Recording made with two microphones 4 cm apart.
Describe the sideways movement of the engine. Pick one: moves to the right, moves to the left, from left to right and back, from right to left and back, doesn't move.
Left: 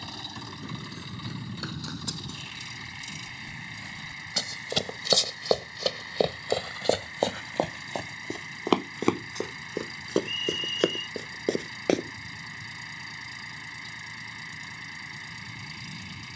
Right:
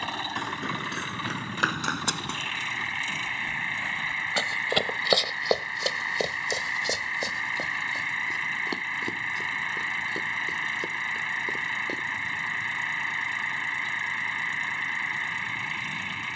doesn't move.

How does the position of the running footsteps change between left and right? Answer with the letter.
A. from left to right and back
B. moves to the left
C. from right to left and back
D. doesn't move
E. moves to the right
B.